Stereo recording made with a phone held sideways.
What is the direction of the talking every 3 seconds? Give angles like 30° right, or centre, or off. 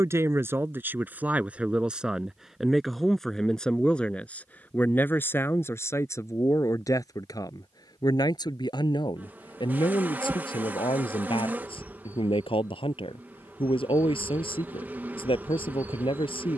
10° right, 10° left, 30° left, 40° left, 40° left, 40° left.